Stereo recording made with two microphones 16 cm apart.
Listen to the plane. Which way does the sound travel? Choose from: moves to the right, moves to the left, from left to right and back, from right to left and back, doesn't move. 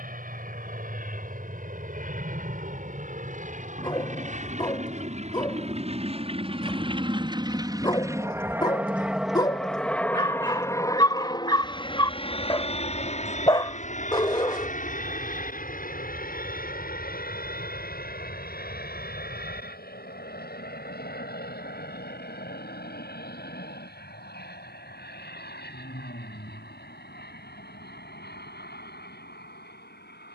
moves to the left.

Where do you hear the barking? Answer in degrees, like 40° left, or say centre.
30° left.